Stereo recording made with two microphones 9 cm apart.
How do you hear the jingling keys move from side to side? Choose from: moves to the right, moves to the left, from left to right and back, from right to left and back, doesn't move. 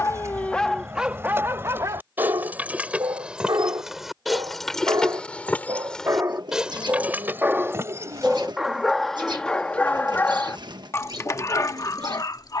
from right to left and back.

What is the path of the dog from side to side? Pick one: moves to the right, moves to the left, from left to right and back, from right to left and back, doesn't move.
from left to right and back.